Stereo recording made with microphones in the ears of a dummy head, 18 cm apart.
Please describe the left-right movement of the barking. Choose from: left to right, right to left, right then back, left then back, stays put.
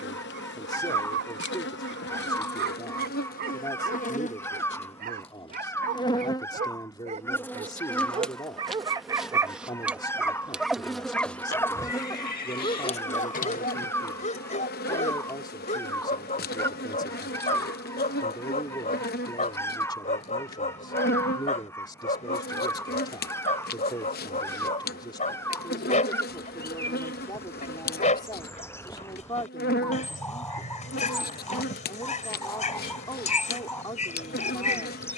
right to left.